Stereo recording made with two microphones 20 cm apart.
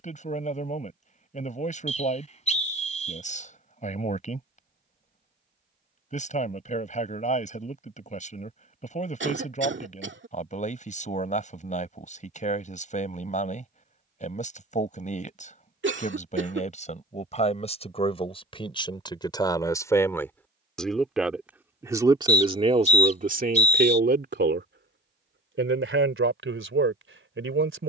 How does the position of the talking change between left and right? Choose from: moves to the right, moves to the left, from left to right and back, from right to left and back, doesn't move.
moves to the right.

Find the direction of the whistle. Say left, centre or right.
left.